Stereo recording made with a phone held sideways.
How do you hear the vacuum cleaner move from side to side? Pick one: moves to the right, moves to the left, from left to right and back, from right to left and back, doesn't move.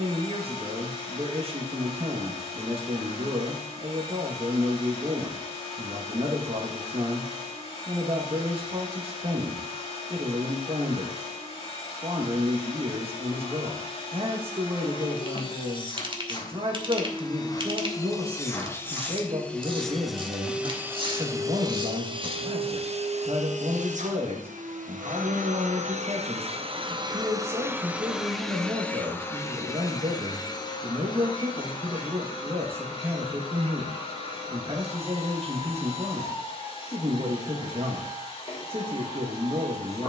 from left to right and back.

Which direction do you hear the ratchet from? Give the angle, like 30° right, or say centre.
40° right.